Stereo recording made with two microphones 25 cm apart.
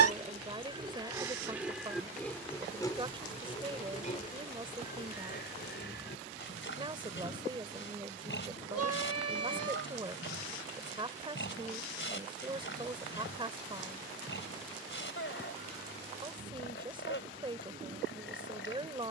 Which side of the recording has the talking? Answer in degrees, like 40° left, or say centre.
20° right.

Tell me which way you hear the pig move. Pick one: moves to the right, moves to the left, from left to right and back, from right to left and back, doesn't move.
moves to the left.